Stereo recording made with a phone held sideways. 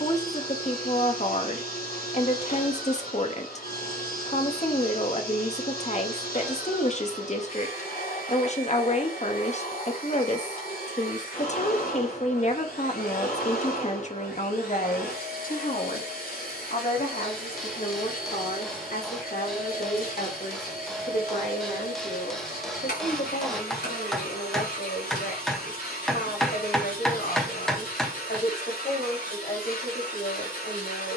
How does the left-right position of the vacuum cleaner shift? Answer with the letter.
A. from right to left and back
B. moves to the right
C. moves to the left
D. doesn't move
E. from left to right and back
D.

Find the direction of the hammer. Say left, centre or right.
centre.